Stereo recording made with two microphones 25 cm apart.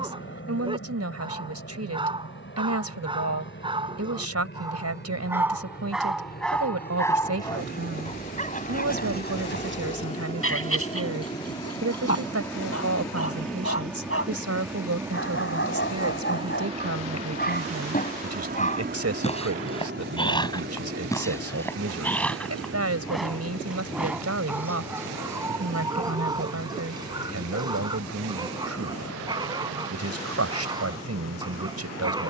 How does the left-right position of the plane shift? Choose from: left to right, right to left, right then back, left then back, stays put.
left to right.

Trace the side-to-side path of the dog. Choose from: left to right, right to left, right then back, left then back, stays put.
left then back.